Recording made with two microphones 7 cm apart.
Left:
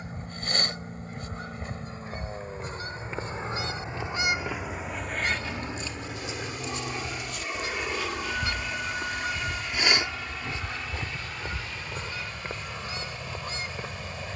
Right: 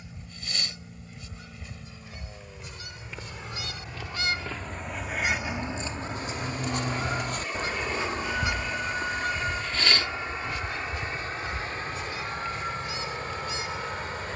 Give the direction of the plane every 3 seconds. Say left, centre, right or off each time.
left, left, centre, right, right.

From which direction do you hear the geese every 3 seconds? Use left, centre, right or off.
left, centre, right, left, left.